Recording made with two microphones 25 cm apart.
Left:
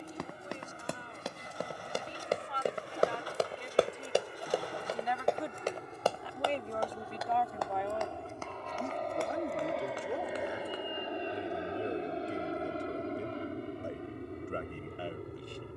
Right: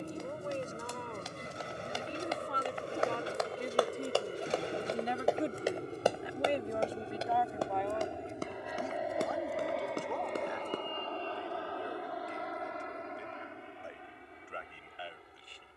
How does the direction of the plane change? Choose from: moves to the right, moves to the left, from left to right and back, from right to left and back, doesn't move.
moves to the left.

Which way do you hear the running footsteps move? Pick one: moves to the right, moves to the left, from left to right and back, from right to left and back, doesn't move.
moves to the right.